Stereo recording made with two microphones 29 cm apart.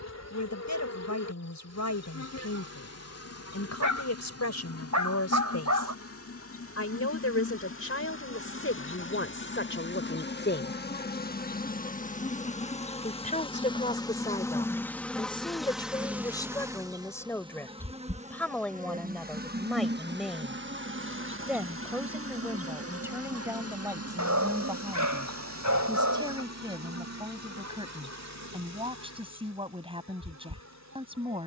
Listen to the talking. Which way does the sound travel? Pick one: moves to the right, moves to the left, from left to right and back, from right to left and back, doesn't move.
moves to the right.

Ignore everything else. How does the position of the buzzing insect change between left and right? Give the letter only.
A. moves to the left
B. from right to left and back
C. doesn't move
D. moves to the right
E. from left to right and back
D.